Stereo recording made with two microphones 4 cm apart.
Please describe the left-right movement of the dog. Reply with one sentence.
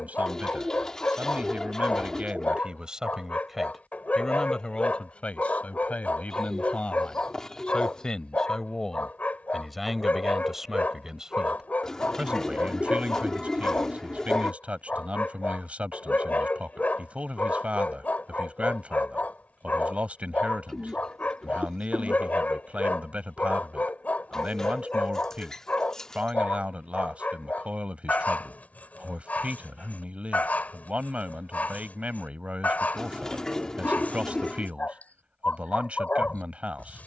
You can hear the dog stay in one place.